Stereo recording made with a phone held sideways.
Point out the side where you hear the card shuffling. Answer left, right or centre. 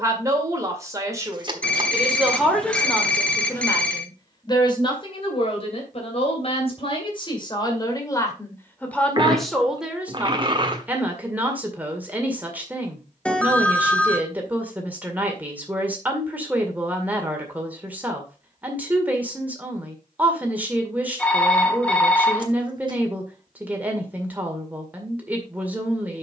right.